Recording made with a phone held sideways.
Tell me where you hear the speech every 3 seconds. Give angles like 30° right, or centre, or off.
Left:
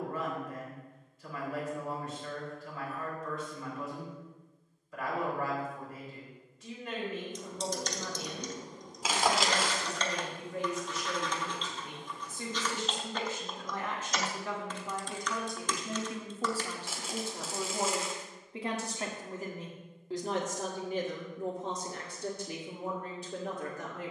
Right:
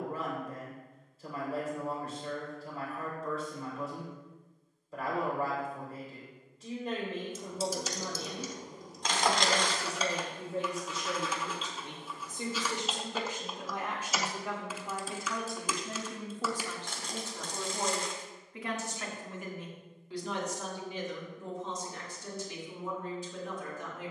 30° right, 30° right, 30° right, 30° right, 10° right, 10° left, 40° left, 60° left.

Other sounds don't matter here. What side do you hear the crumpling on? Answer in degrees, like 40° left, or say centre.
10° left.